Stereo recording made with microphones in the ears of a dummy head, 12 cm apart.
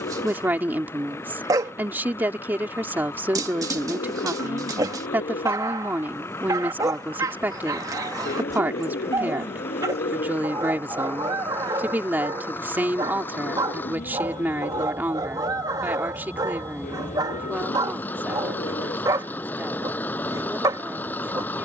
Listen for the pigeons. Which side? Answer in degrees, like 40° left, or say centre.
70° left.